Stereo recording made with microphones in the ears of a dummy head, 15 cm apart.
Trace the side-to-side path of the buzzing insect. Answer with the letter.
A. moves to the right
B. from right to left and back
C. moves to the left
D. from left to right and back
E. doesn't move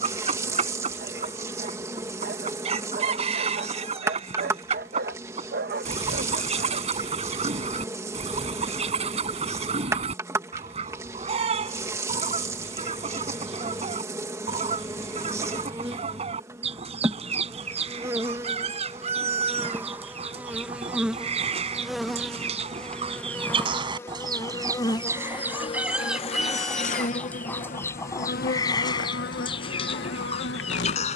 C.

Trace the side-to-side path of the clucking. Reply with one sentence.
You can hear the clucking move from right to left.